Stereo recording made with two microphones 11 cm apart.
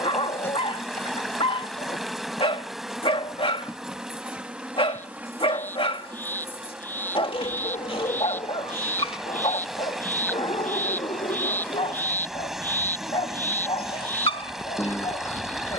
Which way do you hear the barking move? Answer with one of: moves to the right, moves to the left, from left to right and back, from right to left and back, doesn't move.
doesn't move.